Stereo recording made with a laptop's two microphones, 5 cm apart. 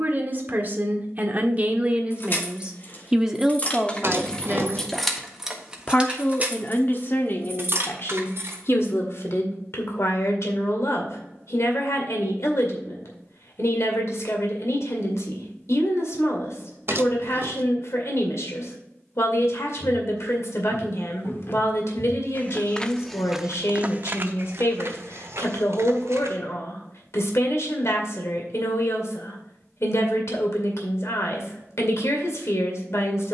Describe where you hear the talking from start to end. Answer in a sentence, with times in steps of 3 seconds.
You can hear the talking on the right from 0 s, in the centre from 3 s and on the left from 6 s.